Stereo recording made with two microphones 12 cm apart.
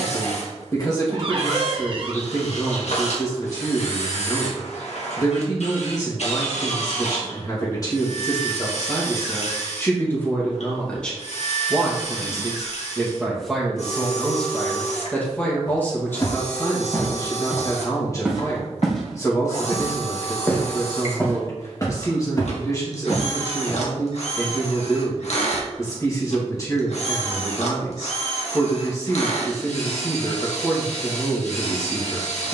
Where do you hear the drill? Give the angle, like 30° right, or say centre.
70° left.